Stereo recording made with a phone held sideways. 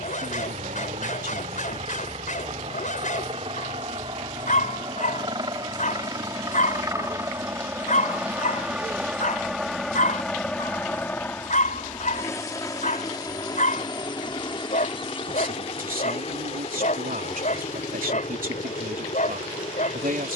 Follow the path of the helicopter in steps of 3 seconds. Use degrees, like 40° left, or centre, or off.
50° right, 40° right, 20° right, 10° left, 30° left, 40° left, 50° left.